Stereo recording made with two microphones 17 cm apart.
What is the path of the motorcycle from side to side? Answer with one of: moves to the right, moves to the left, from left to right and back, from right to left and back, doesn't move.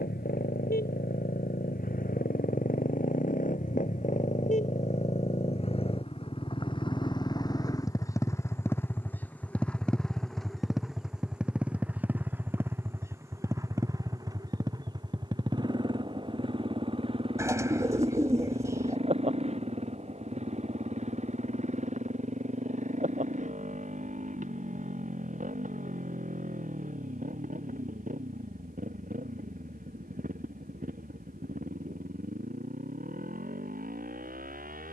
moves to the right.